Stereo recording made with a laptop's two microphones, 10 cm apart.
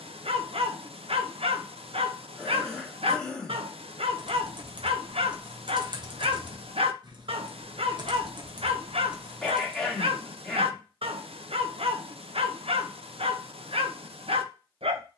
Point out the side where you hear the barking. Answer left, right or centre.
right.